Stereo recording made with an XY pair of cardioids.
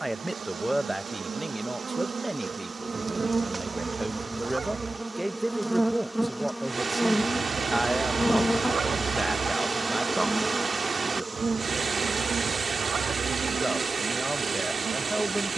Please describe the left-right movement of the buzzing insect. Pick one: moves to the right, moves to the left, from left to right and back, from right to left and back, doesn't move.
from right to left and back.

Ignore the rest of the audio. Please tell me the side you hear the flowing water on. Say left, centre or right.
right.